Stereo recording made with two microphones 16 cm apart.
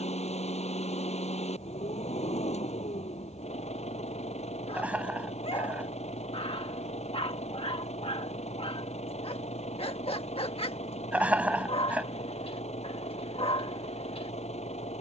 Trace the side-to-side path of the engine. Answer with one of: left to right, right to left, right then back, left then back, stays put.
stays put.